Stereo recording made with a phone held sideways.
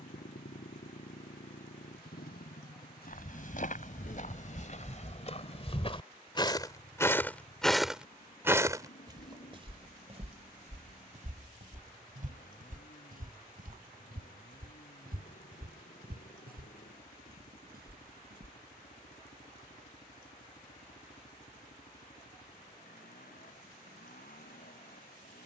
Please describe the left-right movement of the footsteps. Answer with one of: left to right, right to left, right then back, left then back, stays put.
left to right.